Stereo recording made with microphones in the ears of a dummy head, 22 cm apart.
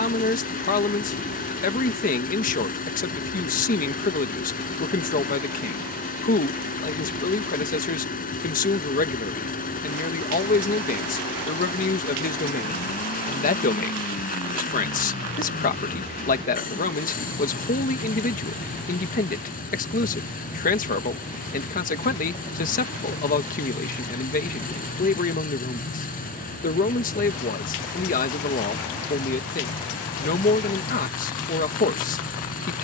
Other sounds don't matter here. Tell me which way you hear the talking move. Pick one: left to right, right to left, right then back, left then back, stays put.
stays put.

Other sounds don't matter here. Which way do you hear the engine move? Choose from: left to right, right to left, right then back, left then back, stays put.
stays put.